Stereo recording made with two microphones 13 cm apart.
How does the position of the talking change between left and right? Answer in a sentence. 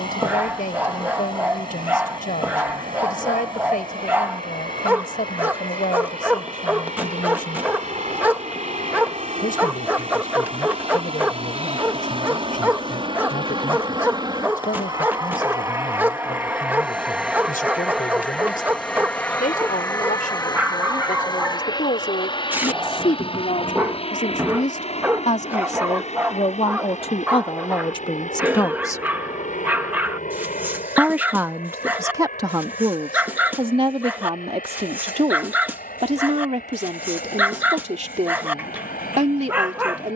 In this clip you hear the talking travel towards the right.